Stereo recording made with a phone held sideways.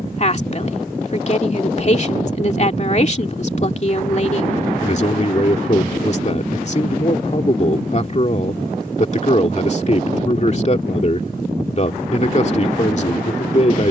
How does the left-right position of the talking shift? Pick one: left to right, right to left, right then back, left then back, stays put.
stays put.